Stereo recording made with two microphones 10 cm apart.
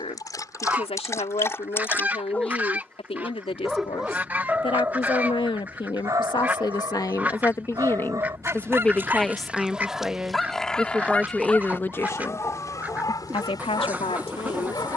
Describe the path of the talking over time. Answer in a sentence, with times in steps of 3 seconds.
You can hear the talking on the left from 0 s, in the centre from 9 s and on the left from 12 s.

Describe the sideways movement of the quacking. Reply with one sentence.
In this clip you hear the quacking stay in one place.